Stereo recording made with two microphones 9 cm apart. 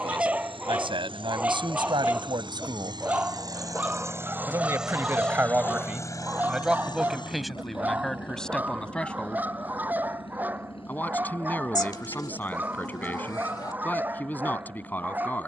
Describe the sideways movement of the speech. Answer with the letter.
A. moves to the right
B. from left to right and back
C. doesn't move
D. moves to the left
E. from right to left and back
D.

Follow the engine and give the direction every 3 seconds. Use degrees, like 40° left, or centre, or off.
60° right, 20° right, 60° left, 80° left, 80° left.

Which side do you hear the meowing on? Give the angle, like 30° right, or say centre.
50° left.